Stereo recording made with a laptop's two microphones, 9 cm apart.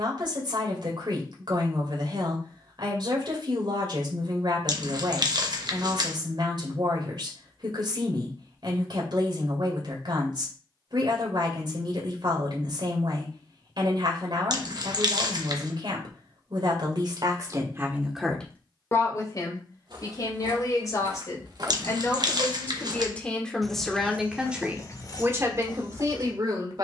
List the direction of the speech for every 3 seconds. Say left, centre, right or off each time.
right, right, right, right, right, right, left, left, right.